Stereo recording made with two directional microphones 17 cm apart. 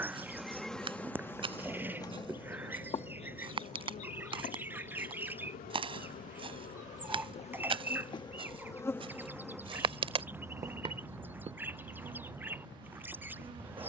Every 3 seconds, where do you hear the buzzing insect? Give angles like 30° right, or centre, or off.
10° left, 40° left, 30° left, 10° right, 30° right.